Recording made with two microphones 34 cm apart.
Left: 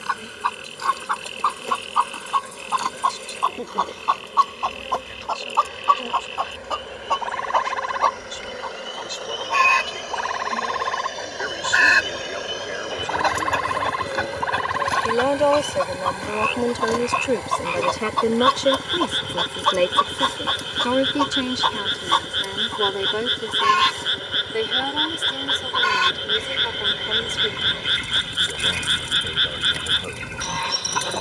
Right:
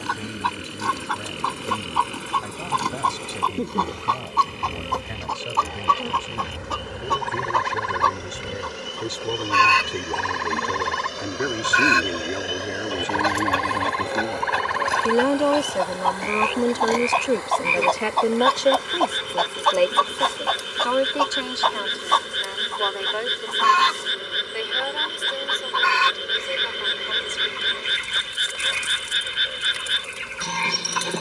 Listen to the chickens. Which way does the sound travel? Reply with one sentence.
In this clip you hear the chickens go from the right side to the left.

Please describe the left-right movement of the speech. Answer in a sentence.
In this clip you hear the speech move to the left.